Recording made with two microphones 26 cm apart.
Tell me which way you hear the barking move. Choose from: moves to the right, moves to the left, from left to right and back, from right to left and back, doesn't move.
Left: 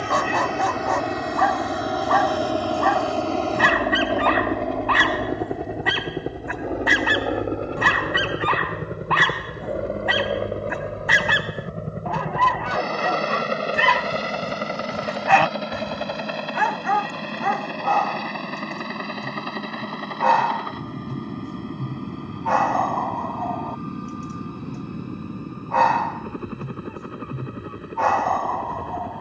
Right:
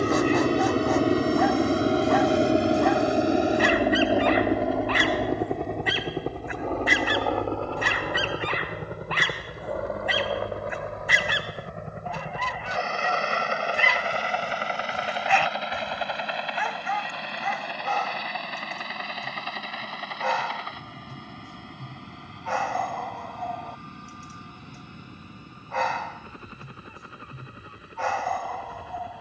doesn't move.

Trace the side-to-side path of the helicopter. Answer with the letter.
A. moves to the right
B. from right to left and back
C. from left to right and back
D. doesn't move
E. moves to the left
E.